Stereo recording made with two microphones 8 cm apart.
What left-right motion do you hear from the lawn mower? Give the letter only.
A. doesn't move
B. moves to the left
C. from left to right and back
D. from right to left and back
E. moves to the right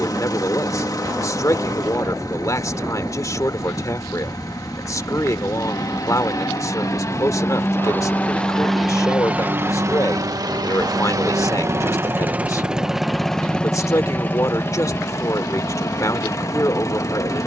C.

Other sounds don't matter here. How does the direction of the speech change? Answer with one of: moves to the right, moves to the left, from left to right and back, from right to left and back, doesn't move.
doesn't move.